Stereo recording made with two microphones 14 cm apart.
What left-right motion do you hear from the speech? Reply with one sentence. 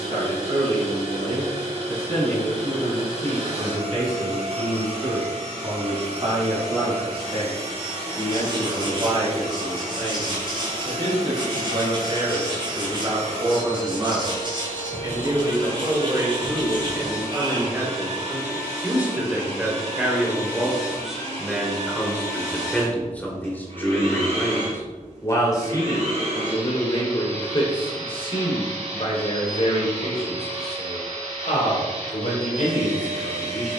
You can hear the speech travel towards the left.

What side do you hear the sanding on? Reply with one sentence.
You can hear the sanding on the right.